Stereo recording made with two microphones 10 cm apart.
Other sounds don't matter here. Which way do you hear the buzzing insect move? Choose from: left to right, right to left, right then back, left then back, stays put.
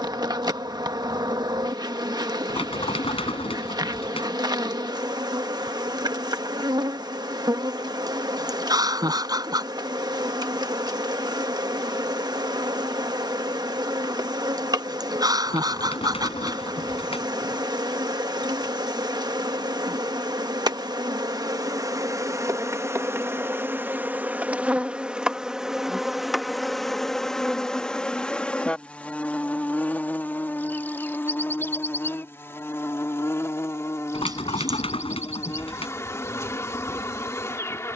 right to left.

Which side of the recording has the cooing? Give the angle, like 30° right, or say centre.
80° left.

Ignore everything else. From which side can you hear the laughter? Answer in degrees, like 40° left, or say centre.
40° right.